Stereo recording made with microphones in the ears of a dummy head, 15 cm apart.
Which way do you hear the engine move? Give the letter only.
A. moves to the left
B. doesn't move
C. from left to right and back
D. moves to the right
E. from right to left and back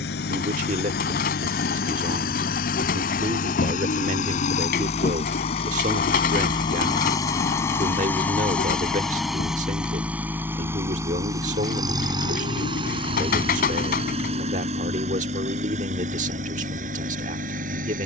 D.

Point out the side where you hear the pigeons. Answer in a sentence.
In this clip you hear the pigeons on the left.